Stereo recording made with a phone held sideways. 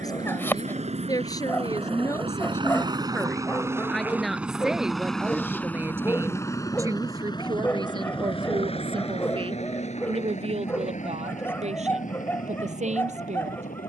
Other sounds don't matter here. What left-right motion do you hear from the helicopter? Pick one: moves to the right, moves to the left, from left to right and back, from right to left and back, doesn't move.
moves to the left.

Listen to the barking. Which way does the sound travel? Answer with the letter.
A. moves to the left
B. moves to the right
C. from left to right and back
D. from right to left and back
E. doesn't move
E.